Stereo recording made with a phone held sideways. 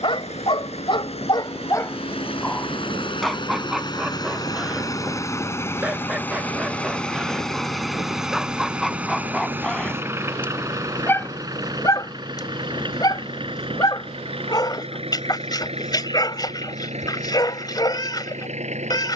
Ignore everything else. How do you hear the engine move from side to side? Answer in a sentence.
You can hear the engine travel towards the right.